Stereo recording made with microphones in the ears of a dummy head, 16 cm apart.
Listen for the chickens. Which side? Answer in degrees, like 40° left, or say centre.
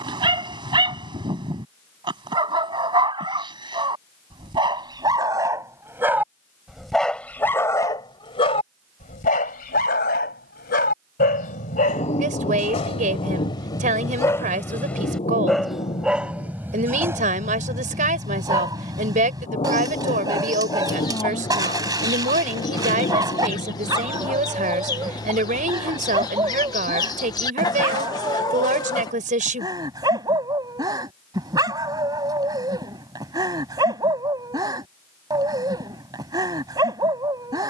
20° left.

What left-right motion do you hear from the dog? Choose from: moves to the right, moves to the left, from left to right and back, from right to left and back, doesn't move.
from right to left and back.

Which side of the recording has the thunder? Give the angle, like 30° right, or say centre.
30° left.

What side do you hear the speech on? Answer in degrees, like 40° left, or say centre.
40° right.